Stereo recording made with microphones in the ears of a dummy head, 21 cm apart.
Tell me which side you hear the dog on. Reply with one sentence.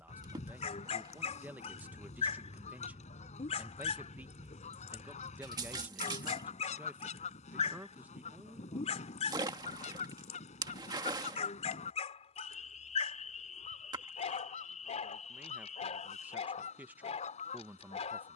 You can hear the dog on the left.